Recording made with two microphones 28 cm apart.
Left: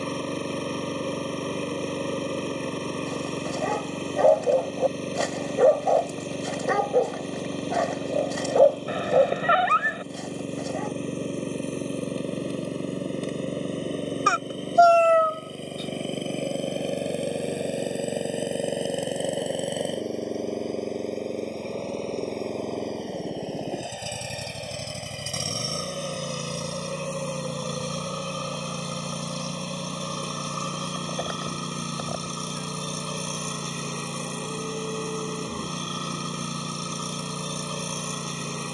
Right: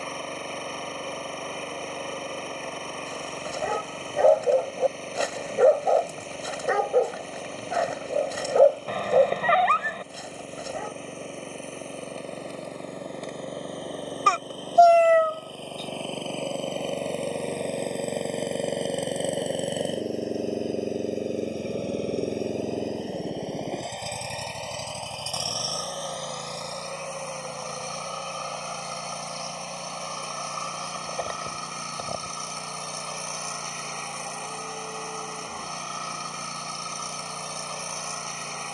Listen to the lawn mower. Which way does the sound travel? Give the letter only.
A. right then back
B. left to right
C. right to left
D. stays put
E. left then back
A.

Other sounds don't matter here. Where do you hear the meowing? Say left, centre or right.
centre.